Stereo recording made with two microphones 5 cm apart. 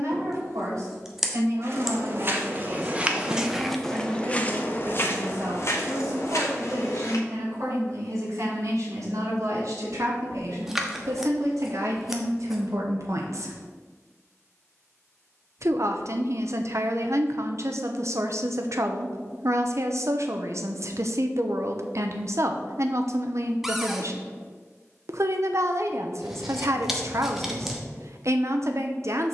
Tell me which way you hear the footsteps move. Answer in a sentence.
In this clip you hear the footsteps travel towards the left.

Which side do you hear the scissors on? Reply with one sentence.
You can hear the scissors in the centre.